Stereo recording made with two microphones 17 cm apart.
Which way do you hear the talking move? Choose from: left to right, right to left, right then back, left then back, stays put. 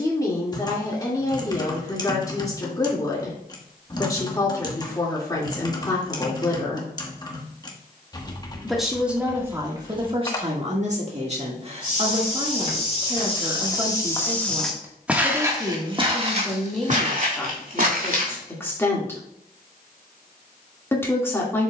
right then back.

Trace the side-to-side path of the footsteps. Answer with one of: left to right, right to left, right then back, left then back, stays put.
left to right.